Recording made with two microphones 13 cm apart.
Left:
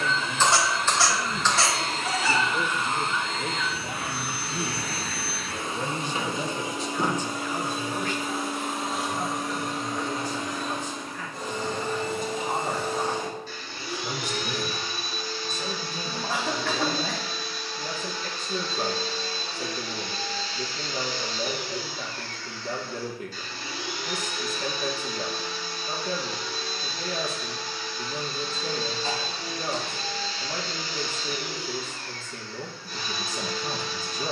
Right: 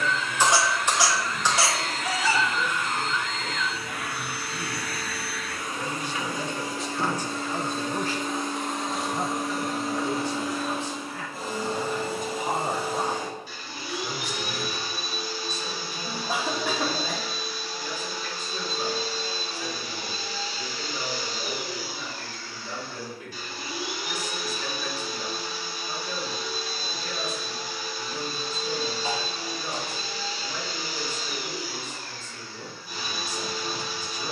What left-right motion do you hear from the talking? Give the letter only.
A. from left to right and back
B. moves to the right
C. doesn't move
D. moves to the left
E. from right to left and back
A.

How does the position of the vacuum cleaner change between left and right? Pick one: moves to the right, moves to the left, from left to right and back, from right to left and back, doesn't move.
moves to the right.